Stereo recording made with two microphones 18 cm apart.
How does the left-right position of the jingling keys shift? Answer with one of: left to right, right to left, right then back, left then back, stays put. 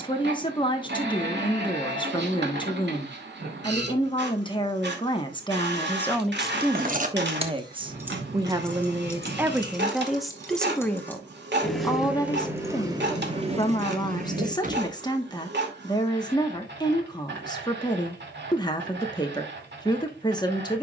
left then back.